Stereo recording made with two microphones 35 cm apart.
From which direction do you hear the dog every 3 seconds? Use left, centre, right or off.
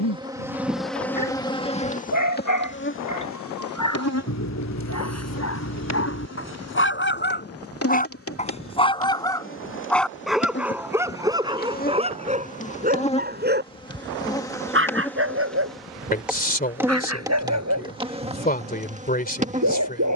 left, left, left, centre, right, right, right.